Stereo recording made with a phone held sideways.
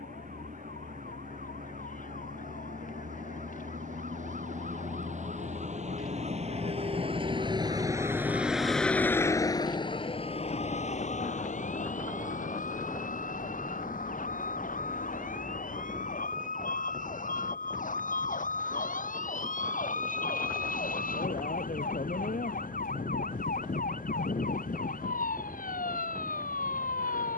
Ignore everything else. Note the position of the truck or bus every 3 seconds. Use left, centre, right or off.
right, right, right, left, left, left, left, left, left.